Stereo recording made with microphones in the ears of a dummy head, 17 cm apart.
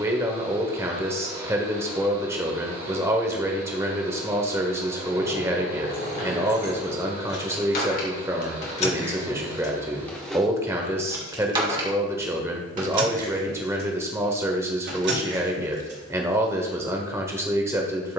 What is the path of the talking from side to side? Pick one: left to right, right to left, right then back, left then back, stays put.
stays put.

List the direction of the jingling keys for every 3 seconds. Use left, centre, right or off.
off, left, left, centre, right, right.